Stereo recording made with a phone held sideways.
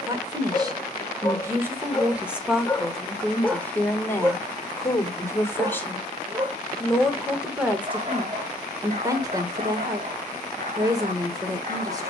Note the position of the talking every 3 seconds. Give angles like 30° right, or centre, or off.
10° right, 10° left, 10° right, 20° right.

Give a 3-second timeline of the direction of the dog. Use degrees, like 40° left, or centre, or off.
20° left, 10° right, 40° right, 50° right.